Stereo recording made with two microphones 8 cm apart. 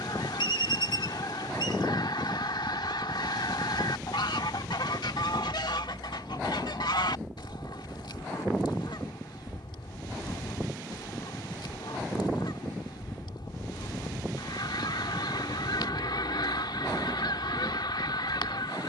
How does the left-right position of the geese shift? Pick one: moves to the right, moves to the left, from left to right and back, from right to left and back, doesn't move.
doesn't move.